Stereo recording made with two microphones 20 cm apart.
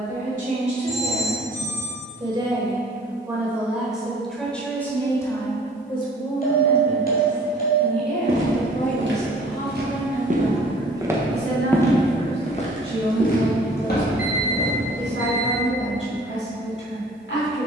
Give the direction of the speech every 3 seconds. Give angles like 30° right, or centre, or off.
30° right, 10° left, 40° left, 60° left, 70° left, 70° left.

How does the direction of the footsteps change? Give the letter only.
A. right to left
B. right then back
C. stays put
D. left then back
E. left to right
A.